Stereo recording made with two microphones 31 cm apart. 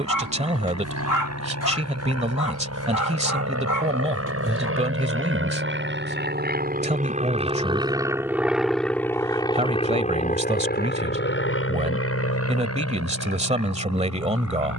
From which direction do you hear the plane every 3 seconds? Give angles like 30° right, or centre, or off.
70° right, 50° right, 20° right, 20° left, 50° left.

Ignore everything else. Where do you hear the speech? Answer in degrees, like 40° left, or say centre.
20° right.